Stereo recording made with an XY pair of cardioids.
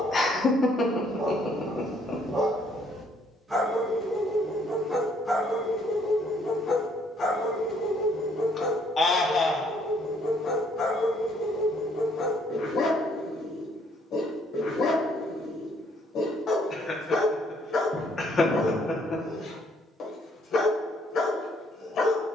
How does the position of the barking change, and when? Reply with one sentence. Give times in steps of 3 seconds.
In this clip you hear the barking on the right from 0 s, in the centre from 3 s and on the left from 6 s.